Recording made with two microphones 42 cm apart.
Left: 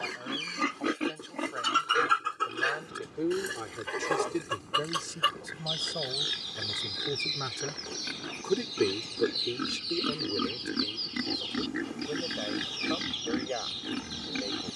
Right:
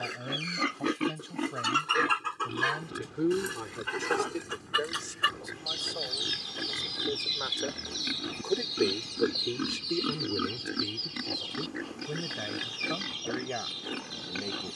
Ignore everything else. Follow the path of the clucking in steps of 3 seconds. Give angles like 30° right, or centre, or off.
centre, 30° right, 50° right, 70° right, 70° right.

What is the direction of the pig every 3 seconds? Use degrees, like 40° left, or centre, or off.
30° right, 60° right, 50° right, 10° left, 40° left.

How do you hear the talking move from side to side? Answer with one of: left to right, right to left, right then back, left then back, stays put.
left then back.